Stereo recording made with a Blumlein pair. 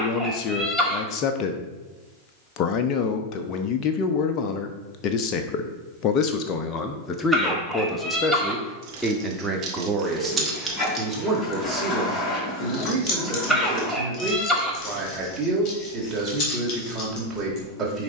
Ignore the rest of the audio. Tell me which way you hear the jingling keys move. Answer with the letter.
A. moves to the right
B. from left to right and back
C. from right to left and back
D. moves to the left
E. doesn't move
D.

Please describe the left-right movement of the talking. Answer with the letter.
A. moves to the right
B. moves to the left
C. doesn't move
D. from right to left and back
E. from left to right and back
A.